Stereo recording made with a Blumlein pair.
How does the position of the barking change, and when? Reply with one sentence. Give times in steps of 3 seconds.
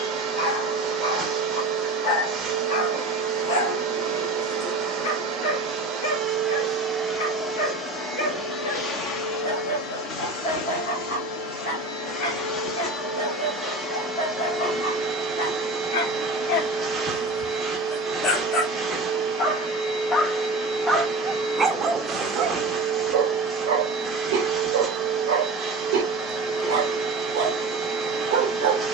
In this clip you hear the barking on the left from 0 s and on the right from 21 s.